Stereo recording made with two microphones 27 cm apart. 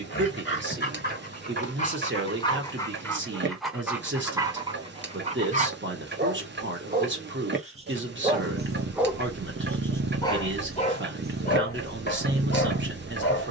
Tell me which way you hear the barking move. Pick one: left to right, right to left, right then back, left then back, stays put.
right then back.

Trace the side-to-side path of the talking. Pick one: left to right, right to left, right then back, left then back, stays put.
stays put.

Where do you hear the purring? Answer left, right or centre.
right.